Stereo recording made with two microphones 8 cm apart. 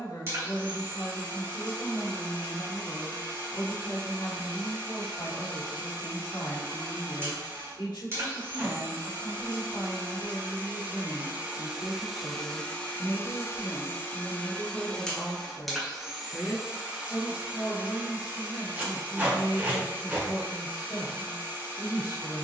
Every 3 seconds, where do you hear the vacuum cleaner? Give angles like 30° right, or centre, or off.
30° right, 30° right, 30° right, 30° right, 20° left, 10° right, 30° right, 30° right.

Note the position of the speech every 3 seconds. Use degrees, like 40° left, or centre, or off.
70° left, 70° left, 70° left, 70° left, 40° left, 10° left, 60° left, 60° left.